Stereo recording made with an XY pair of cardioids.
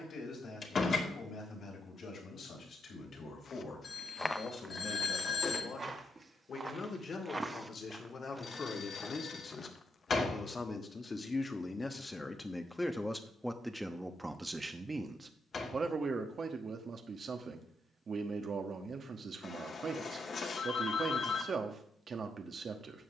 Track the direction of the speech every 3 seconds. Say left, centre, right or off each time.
left, left, left, left, centre, right, right, right.